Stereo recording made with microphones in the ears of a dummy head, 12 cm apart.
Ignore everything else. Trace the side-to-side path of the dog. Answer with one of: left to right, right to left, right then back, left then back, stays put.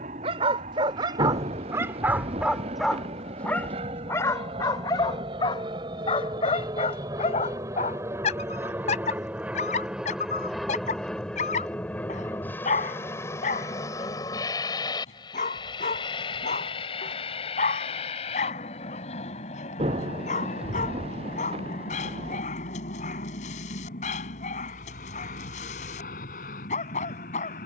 right to left.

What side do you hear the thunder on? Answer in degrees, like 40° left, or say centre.
50° right.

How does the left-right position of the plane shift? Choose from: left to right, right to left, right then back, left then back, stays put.
right to left.